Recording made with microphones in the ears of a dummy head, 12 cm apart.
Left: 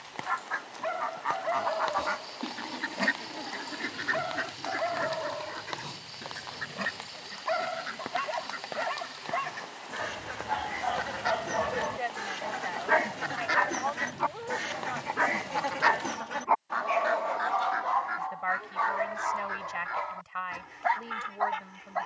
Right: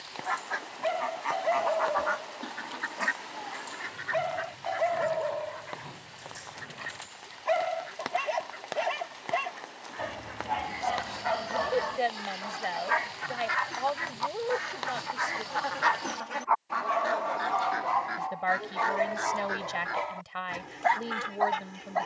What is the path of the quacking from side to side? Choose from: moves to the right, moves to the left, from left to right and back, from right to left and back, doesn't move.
from right to left and back.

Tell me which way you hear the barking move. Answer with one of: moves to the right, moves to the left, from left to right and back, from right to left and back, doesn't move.
from right to left and back.